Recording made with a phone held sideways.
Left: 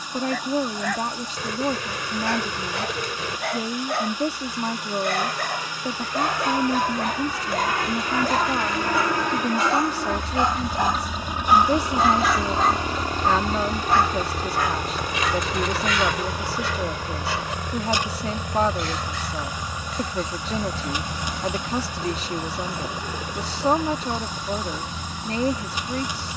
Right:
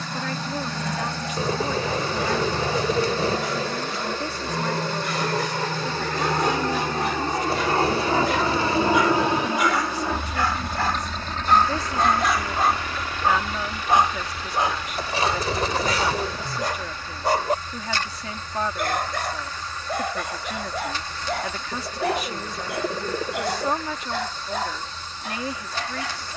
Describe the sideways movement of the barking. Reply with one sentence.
In this clip you hear the barking go from the left side to the right.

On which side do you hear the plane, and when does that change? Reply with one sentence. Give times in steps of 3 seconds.
You can hear the plane on the right from 0 s, in the centre from 9 s and on the left from 12 s.